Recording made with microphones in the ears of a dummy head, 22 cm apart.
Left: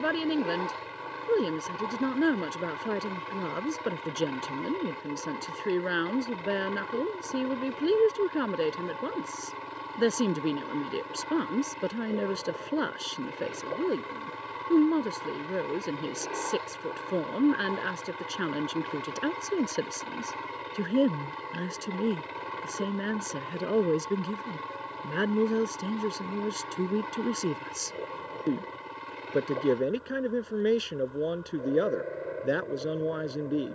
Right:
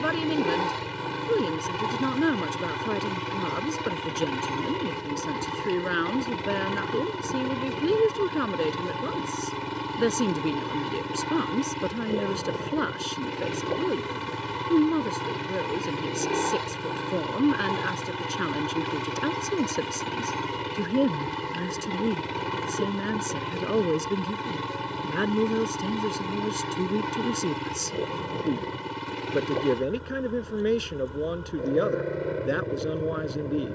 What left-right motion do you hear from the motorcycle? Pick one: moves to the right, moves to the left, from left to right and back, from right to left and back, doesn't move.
doesn't move.